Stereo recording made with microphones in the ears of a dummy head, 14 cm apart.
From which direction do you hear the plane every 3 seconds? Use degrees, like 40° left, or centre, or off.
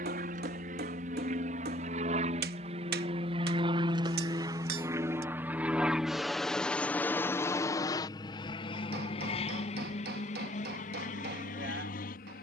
50° right, 20° right, 20° left, 50° left.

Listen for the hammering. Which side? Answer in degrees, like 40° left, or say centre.
70° right.